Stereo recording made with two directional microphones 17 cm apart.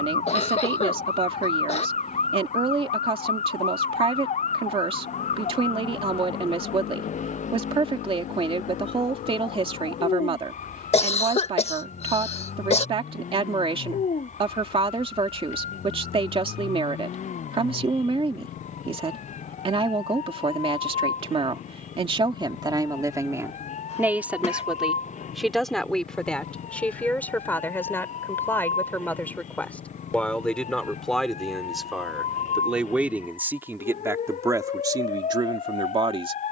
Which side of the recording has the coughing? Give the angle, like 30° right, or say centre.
40° left.